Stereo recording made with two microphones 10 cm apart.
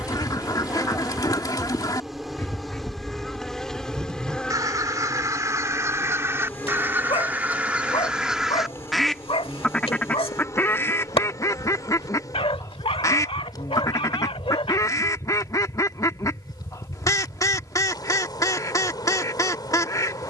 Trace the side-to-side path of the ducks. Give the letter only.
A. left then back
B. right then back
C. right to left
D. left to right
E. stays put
B.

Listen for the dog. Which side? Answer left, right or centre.
left.